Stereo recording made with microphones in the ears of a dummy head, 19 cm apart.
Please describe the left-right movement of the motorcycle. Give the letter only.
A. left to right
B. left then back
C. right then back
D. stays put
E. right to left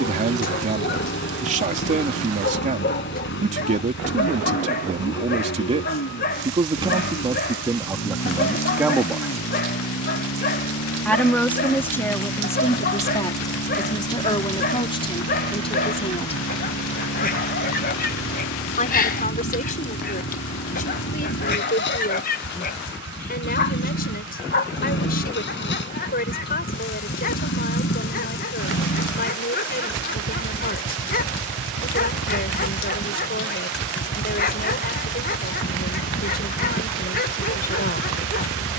D.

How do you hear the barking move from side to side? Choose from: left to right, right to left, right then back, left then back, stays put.
stays put.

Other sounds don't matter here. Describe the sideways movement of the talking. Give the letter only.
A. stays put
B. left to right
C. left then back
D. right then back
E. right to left
E.